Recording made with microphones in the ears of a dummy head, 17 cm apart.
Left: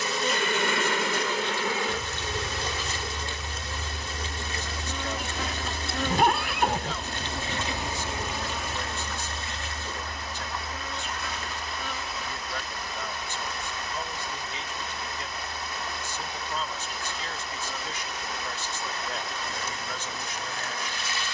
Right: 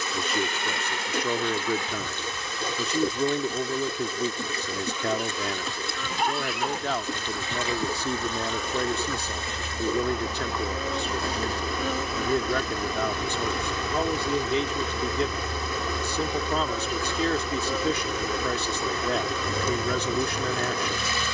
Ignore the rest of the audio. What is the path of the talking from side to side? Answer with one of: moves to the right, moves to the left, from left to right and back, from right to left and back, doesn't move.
doesn't move.